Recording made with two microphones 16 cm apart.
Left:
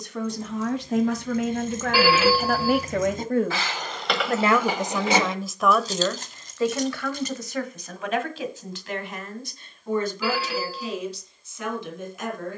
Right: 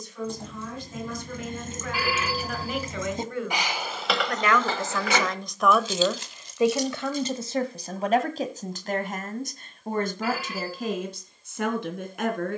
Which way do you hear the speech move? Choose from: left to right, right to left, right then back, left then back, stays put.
left to right.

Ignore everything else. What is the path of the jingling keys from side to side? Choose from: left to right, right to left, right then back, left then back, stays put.
right to left.